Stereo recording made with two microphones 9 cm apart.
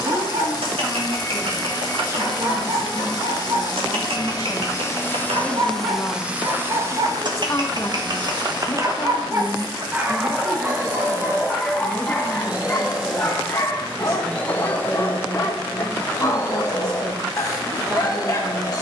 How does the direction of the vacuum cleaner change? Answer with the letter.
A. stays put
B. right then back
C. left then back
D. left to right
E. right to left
B.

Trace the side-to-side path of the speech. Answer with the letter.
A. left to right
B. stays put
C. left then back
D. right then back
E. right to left
C.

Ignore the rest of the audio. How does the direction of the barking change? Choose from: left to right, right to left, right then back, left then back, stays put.
right to left.